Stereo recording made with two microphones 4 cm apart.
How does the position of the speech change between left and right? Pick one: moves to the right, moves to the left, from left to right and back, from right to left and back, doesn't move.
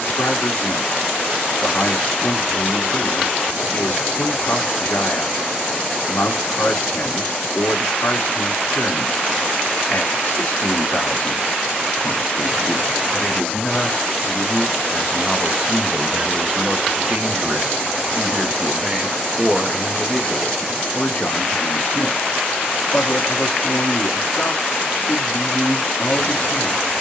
from left to right and back.